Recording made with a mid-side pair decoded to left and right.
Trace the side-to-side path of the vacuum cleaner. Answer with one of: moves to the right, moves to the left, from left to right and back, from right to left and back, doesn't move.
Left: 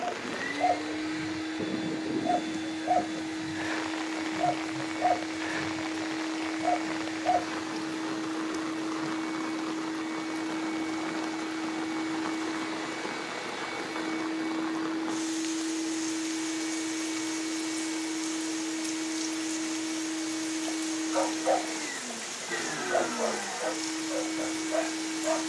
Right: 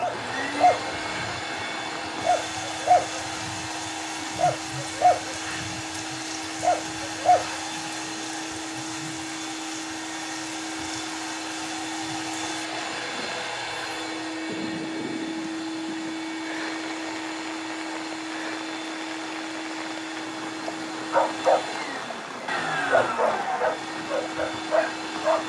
doesn't move.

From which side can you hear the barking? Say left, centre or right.
right.